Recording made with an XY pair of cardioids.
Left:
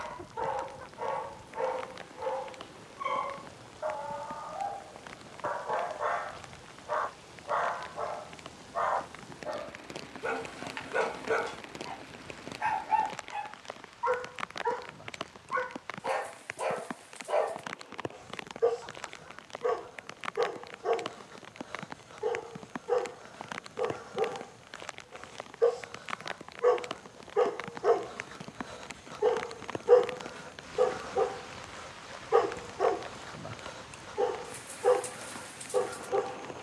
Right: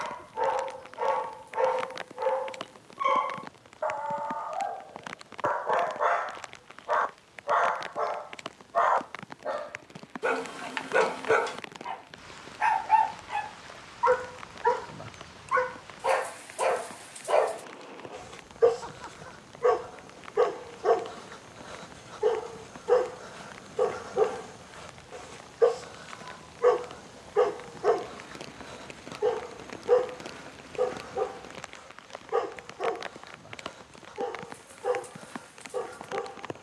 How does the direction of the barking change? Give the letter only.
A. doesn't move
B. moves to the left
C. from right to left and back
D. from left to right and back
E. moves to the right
B.